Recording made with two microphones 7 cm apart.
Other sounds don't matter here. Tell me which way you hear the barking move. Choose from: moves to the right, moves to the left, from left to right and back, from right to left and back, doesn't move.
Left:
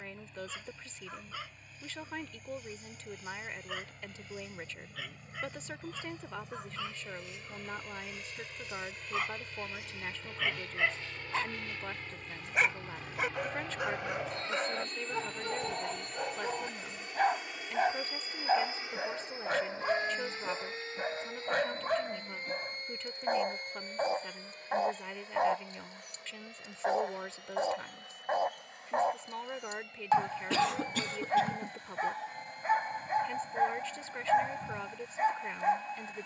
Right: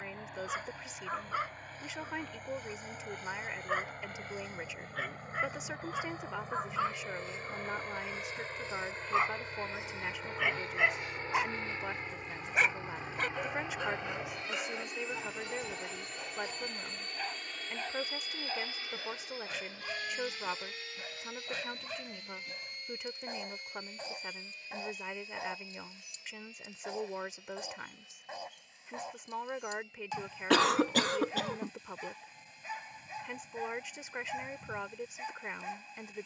moves to the left.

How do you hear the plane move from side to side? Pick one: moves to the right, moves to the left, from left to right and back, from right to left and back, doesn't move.
moves to the left.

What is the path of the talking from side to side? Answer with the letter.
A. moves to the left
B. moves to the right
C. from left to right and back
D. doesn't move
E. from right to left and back
D.